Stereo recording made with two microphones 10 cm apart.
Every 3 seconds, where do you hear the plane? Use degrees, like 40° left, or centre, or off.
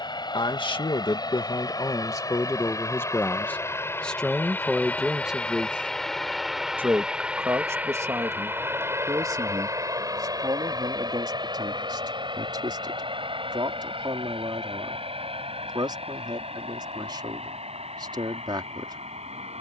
40° left, 20° left, 10° right, 30° right, 50° right, 60° right, 60° right.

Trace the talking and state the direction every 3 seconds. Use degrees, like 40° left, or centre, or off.
40° left, centre, 30° right, 40° right, 40° right, 40° right, 40° right.